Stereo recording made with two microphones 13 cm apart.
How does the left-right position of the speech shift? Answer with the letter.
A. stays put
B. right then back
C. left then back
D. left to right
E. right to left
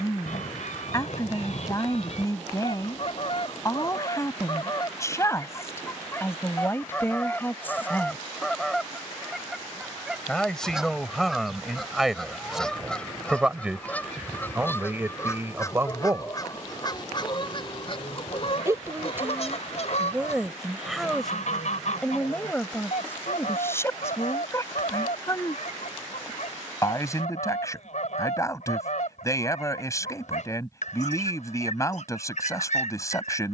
B.